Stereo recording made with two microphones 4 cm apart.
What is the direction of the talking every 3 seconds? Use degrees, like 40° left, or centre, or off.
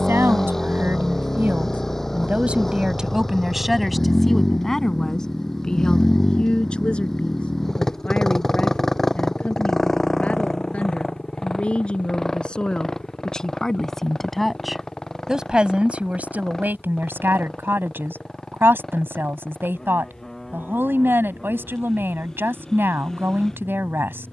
50° right, 10° left, 30° left, 30° left, 20° left, 40° right, 60° right, 60° right.